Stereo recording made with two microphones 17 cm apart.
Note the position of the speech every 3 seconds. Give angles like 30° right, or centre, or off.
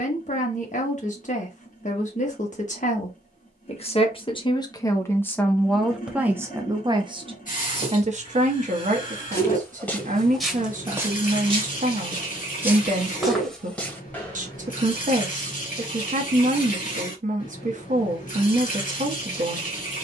50° left, 20° left, 30° right, 50° right, 50° right, 50° right, 50° right.